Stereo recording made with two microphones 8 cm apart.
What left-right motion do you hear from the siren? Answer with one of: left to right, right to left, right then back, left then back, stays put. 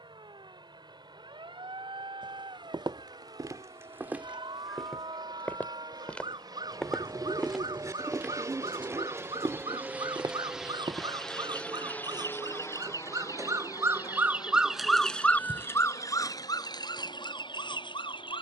right to left.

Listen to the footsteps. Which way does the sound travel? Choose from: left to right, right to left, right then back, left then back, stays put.
left then back.